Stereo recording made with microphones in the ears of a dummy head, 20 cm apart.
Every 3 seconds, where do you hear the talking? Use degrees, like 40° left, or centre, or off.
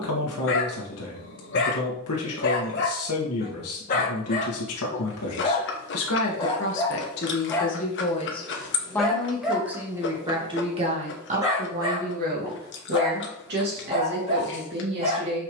70° left, 70° left, 40° left, 20° right, 50° right.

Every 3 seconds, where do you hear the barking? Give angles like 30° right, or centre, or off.
60° left, 40° left, 10° left, 10° right, 30° right.